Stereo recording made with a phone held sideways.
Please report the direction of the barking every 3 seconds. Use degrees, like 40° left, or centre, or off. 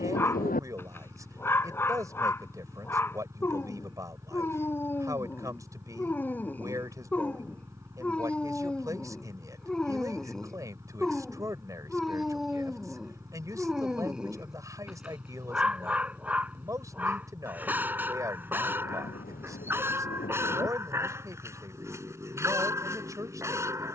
20° left, 20° left, 10° left, centre, centre, 10° right, 20° right, 20° right.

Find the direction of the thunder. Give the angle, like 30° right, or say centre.
80° left.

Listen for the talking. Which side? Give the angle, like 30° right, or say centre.
20° right.